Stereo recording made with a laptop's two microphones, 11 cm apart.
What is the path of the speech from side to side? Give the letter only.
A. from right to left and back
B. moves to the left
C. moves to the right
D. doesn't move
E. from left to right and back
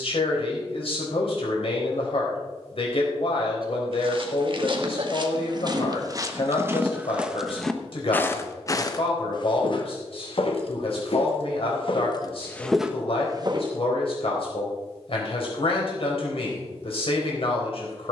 D.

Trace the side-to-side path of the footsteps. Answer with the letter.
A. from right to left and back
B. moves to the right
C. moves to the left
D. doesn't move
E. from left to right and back
A.